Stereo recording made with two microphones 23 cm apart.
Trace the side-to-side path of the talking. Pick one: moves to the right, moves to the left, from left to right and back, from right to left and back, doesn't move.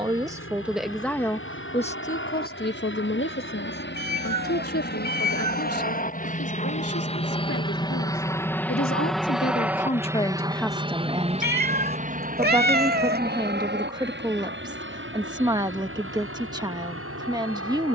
from right to left and back.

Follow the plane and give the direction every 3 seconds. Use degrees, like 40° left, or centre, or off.
60° left, 50° left, 20° left, 20° right, 40° right, 60° right.